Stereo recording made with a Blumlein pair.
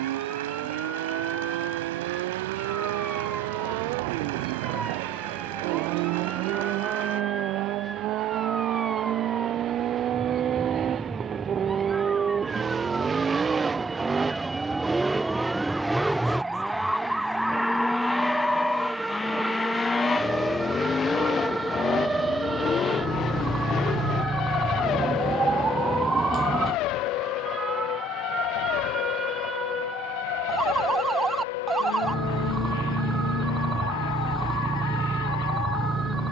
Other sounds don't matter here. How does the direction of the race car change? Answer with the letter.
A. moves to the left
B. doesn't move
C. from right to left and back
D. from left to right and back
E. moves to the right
A.